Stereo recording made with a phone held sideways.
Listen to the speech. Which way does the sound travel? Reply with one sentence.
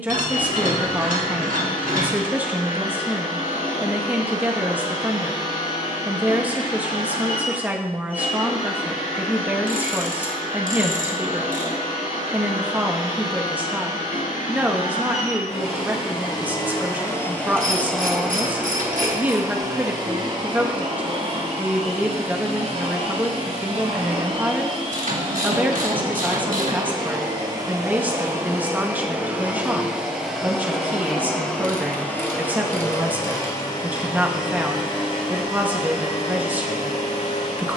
You can hear the speech stay put.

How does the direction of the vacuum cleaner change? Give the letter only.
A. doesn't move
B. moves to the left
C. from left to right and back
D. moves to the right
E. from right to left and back
C.